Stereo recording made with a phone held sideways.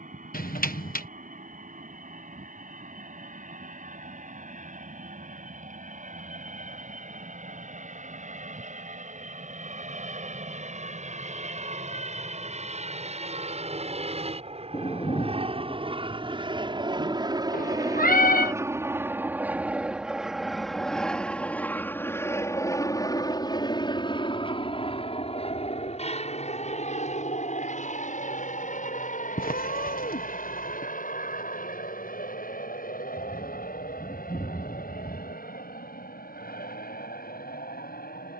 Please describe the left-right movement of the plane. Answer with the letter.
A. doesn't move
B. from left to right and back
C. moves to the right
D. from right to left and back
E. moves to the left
E.